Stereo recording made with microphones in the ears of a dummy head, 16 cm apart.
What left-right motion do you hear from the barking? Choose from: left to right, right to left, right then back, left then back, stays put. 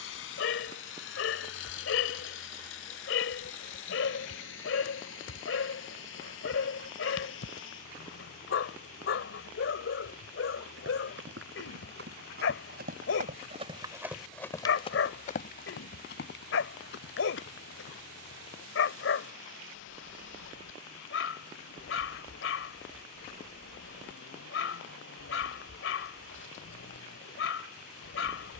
stays put.